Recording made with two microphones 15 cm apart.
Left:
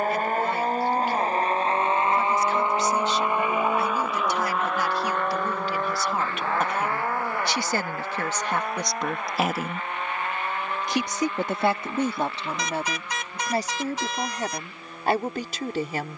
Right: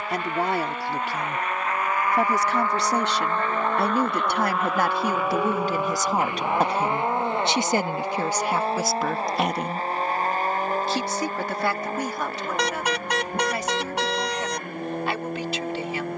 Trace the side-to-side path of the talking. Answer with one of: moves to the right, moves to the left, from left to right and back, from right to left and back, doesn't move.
moves to the left.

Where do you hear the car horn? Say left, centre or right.
right.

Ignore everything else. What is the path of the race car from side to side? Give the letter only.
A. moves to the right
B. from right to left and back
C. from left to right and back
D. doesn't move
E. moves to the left
A.